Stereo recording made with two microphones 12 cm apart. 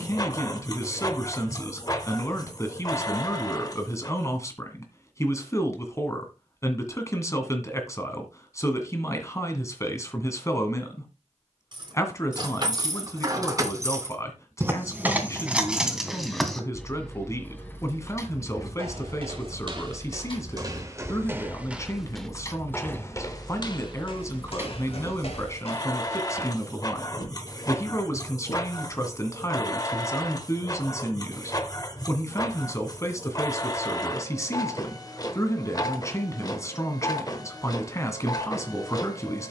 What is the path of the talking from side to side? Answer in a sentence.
In this clip you hear the talking stay in one place.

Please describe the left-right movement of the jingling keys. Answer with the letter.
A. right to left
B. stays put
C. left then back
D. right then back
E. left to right
C.